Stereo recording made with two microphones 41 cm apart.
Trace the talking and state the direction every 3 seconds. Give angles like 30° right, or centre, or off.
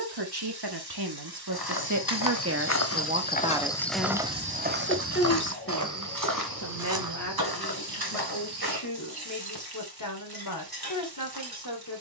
50° right, 10° left, 40° left, 50° left.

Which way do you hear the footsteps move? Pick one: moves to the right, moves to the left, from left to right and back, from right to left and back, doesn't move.
moves to the right.